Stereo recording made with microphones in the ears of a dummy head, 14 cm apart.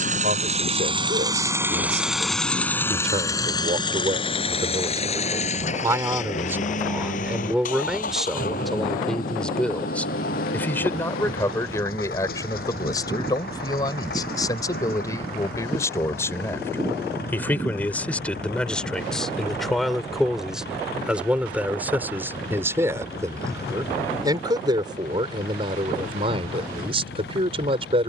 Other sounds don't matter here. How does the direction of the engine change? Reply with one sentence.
You can hear the engine move to the left.